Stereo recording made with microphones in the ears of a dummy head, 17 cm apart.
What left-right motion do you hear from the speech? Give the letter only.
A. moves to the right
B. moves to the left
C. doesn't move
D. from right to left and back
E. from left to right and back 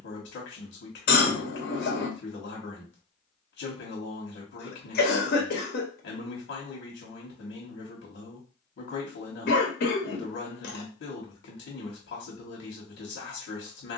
C.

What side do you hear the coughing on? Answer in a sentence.
You can hear the coughing on the left.